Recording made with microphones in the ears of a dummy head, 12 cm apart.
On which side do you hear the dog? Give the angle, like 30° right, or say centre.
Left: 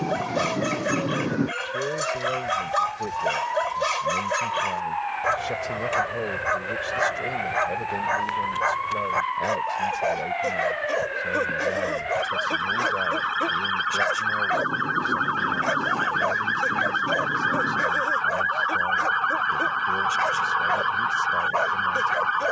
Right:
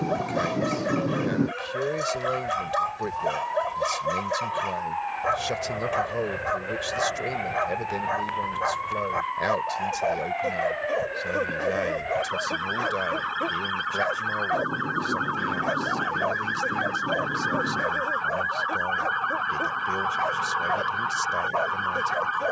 50° left.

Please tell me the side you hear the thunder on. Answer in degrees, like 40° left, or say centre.
20° left.